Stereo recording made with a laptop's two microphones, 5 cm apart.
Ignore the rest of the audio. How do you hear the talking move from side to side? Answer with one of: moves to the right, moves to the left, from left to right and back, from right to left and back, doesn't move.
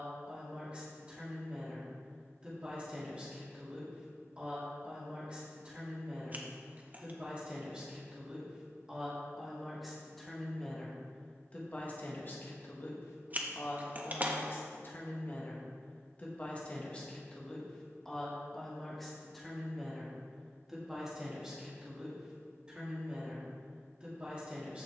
from right to left and back.